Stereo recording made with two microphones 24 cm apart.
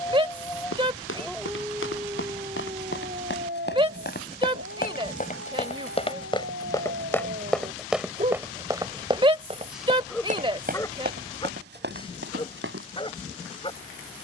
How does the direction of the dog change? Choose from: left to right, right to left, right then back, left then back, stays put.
right then back.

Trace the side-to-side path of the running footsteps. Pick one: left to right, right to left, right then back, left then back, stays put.
left to right.